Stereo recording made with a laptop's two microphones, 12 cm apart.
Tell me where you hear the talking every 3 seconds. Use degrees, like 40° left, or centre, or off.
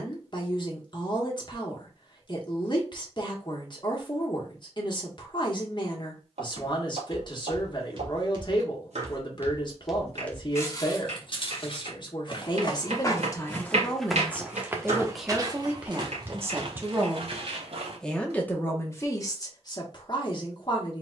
40° left, 40° left, 40° left, 40° left, 30° left, 10° right, 30° left.